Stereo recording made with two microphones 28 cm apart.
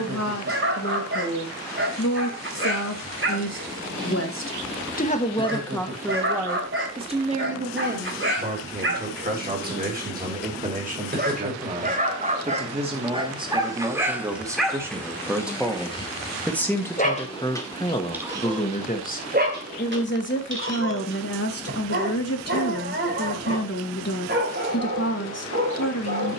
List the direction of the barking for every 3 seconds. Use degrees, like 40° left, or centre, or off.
50° right, 50° right, 50° right, 40° right, 10° right, 20° left, 30° right, 40° right, 40° right.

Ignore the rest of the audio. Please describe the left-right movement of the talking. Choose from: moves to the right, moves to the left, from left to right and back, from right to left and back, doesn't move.
from left to right and back.